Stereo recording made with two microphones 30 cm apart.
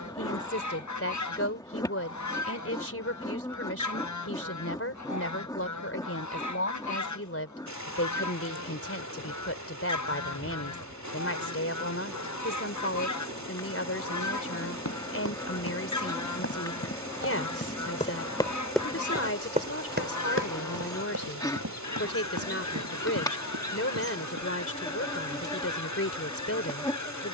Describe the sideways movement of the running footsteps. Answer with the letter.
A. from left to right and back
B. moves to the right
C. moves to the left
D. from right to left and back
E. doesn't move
B.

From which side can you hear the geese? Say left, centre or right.
left.